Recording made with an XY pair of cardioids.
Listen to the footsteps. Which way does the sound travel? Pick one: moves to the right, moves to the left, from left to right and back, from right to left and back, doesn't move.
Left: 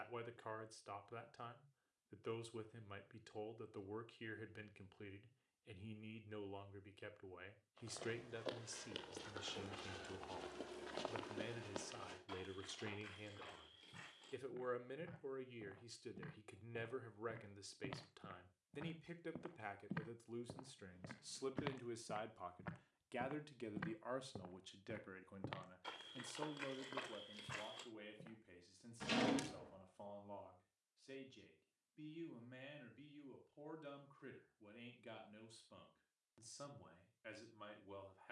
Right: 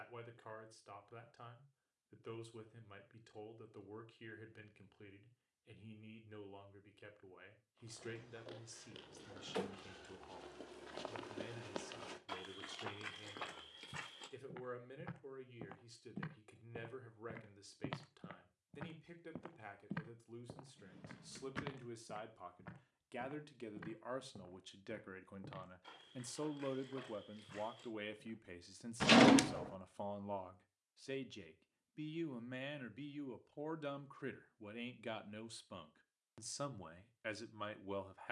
from left to right and back.